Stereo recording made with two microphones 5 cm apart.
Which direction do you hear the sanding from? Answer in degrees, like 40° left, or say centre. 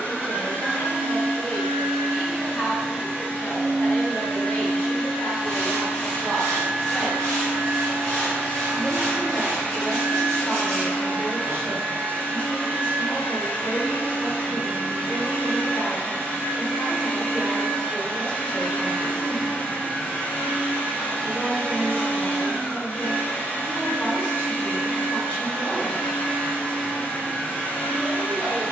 centre.